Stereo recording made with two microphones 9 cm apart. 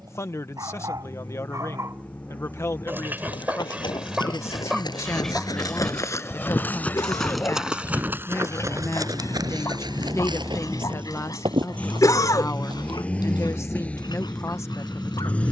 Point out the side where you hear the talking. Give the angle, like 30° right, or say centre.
30° left.